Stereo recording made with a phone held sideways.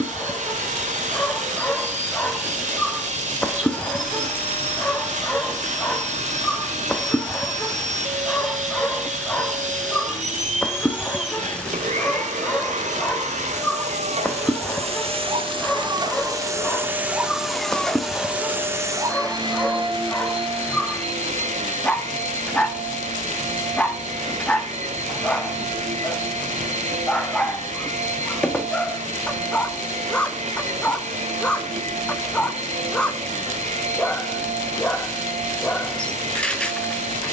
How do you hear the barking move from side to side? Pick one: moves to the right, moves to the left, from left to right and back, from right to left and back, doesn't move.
doesn't move.